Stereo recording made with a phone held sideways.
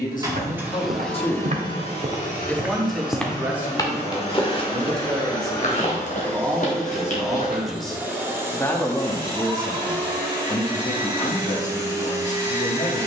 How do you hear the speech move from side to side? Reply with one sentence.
You can hear the speech move from left to right and back again.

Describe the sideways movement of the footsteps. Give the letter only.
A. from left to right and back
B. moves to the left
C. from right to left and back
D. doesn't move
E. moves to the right
B.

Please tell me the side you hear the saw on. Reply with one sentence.
In this clip you hear the saw on the right.